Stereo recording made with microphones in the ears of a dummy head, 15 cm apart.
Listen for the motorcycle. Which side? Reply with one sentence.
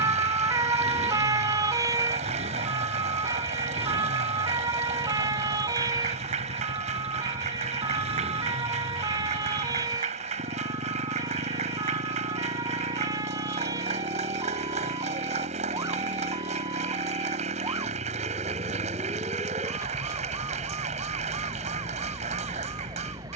In this clip you hear the motorcycle on the right.